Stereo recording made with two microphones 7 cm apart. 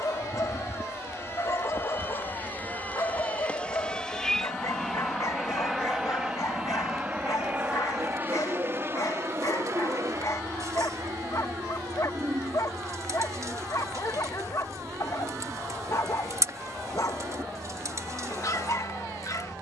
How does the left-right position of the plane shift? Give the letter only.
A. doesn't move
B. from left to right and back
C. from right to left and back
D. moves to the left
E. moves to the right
E.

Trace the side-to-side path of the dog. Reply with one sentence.
In this clip you hear the dog stay in one place.